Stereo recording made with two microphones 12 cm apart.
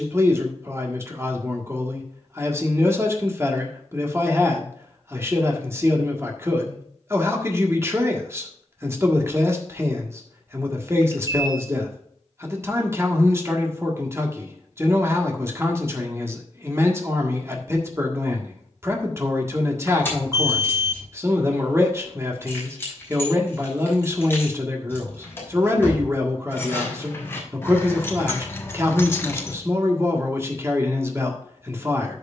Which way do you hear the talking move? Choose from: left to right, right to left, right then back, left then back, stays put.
stays put.